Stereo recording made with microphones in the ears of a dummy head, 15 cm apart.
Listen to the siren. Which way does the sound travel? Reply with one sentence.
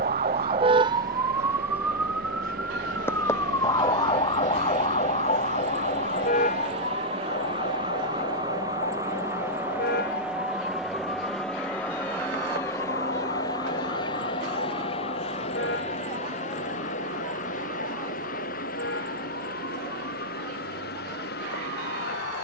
You can hear the siren move to the left.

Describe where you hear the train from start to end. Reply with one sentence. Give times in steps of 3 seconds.
You can hear the train on the right from 0 s, in the centre from 9 s and on the left from 12 s.